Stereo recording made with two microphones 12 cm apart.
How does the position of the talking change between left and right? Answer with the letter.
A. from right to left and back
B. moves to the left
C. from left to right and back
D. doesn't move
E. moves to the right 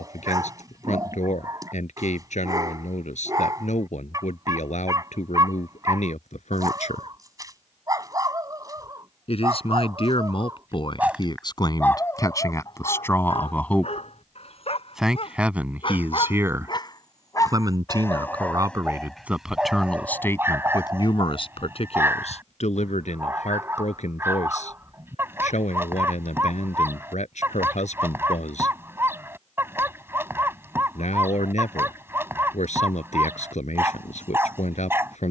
C.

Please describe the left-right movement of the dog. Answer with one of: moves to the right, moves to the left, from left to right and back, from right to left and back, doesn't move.
from right to left and back.